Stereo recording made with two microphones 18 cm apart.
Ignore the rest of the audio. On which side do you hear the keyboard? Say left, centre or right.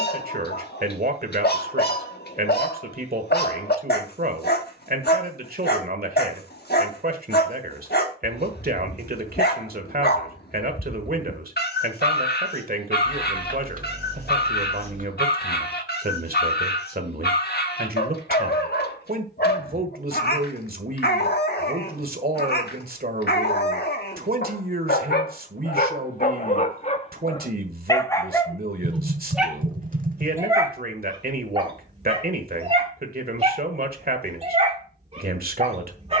right.